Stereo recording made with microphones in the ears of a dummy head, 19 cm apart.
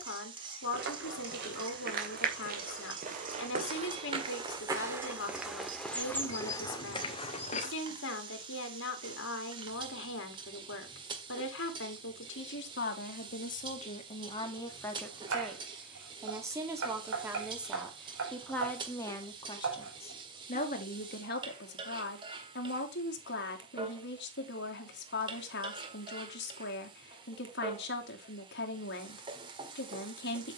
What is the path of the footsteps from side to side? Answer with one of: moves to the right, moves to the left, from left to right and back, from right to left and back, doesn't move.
moves to the left.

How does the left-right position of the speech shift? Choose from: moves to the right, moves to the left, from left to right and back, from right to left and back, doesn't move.
from left to right and back.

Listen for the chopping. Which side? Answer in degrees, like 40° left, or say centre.
60° right.